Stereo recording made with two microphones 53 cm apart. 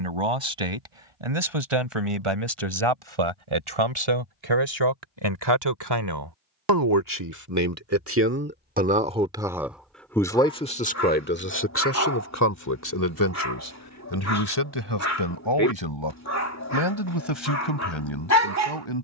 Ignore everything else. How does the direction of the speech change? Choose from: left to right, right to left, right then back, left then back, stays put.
right to left.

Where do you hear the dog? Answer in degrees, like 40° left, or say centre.
30° left.